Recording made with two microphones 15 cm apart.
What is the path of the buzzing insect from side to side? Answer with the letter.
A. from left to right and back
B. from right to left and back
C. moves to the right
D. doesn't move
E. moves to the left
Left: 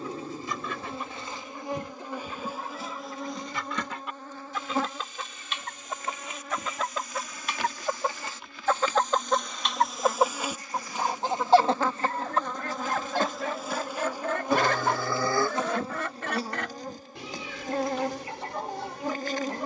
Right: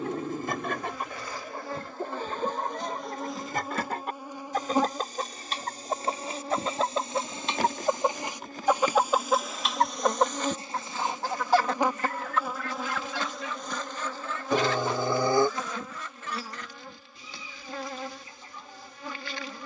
A.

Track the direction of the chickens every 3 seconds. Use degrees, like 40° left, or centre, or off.
50° right, 40° right, 30° right, 10° left, 50° left, 70° left, 80° left.